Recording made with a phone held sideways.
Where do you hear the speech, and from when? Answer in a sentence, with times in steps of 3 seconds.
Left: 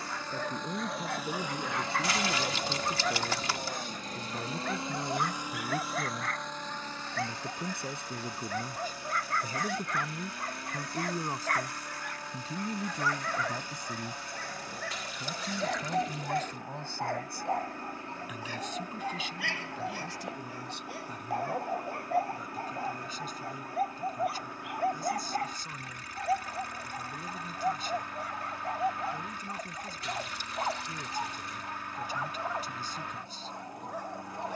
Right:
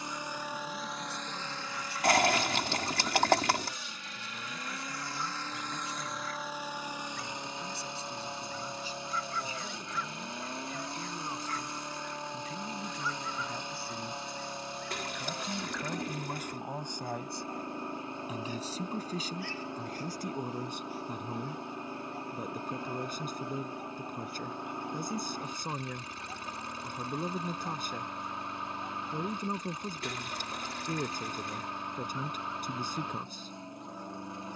In this clip you hear the speech on the left from 0 s, in the centre from 15 s and on the right from 18 s.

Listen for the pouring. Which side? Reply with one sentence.
In this clip you hear the pouring on the right.